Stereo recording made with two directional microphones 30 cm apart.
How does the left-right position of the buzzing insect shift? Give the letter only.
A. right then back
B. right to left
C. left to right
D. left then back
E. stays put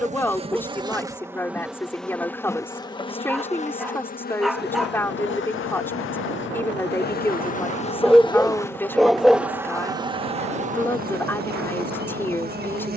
D.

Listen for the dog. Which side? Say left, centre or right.
centre.